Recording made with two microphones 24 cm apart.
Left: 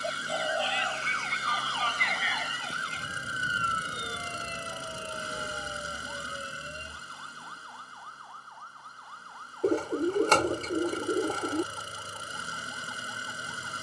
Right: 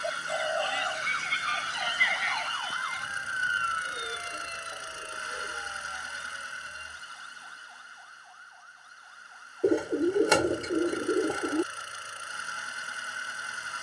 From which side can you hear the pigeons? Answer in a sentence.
In this clip you hear the pigeons in the centre.